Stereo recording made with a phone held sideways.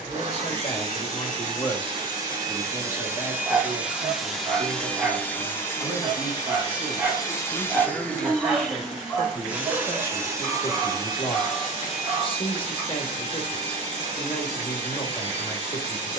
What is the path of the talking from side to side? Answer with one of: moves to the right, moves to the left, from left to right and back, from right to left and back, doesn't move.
from left to right and back.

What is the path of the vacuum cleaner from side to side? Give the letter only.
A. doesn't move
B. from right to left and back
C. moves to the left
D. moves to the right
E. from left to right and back
B.